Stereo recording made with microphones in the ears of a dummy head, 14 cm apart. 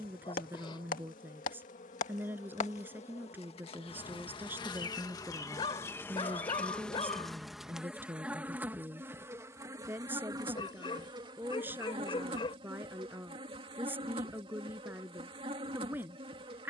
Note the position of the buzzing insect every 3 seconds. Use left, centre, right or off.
left, left, centre, right, right, right.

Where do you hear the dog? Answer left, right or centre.
left.